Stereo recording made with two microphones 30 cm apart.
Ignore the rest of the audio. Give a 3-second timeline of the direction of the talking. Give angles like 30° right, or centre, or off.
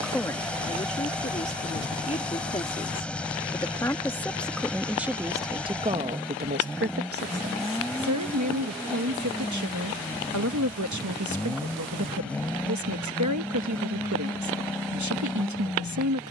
20° left, centre, 50° right, 60° right, 60° right, 60° right.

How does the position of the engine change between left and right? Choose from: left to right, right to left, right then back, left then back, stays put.
stays put.